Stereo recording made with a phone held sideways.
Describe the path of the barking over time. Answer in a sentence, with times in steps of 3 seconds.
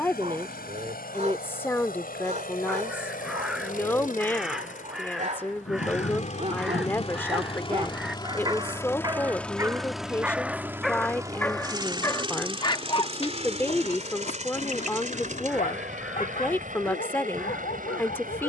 You can hear the barking on the right from 0 s, in the centre from 9 s and on the left from 12 s.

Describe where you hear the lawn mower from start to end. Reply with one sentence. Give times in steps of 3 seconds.
You can hear the lawn mower on the left from 0 s, in the centre from 9 s and on the right from 12 s.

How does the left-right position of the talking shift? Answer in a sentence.
In this clip you hear the talking stay put.